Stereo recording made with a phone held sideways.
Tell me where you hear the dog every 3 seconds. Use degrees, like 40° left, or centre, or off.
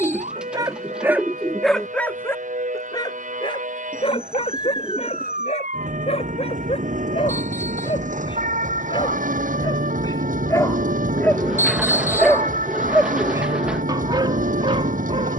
centre, 50° left, 50° left, 30° left, 30° right.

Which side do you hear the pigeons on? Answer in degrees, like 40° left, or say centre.
10° right.